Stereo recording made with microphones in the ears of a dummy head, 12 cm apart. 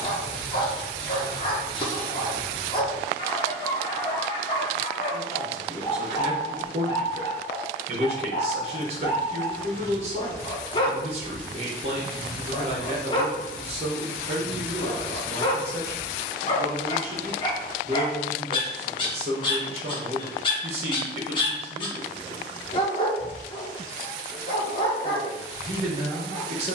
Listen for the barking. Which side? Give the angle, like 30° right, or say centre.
30° left.